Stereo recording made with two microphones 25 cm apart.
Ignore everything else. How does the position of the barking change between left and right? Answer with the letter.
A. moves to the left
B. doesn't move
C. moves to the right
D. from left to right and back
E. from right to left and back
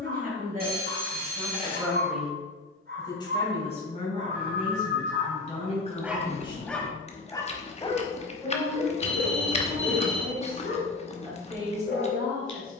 A.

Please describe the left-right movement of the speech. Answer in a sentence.
In this clip you hear the speech move from right to left and back again.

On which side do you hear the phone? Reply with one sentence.
You can hear the phone on the right.